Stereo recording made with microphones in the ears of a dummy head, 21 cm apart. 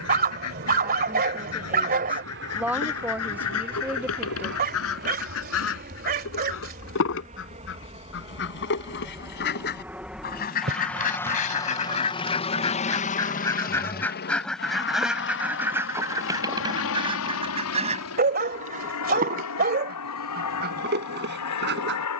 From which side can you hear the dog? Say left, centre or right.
right.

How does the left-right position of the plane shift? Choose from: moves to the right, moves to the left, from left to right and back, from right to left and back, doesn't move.
moves to the left.